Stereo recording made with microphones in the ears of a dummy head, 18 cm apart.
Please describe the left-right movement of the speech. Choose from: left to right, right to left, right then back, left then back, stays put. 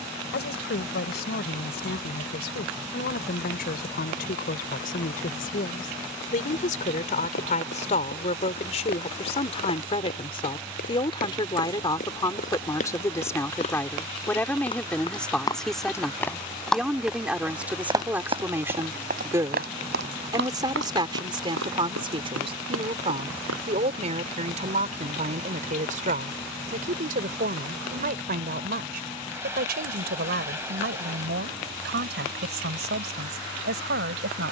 left to right.